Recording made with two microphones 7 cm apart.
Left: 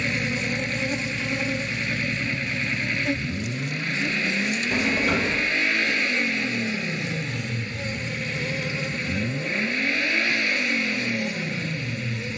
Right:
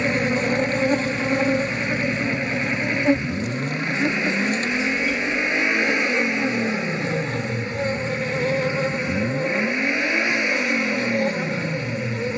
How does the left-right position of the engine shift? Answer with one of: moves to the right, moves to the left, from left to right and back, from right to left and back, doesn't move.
doesn't move.